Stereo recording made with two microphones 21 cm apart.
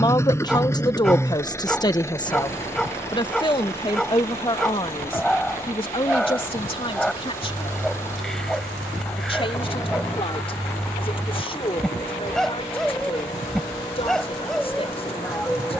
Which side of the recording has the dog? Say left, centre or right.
centre.